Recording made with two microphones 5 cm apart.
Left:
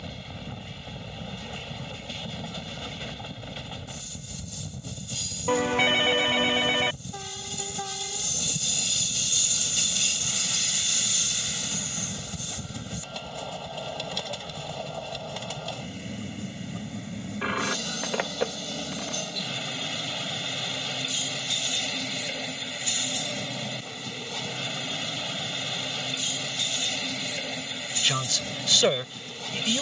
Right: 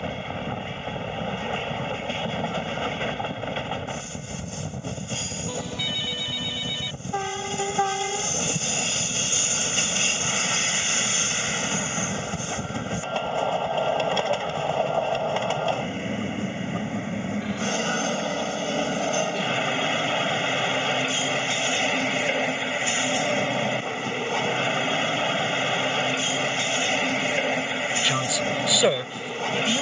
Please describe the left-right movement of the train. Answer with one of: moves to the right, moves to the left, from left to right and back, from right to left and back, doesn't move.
doesn't move.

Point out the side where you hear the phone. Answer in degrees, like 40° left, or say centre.
60° left.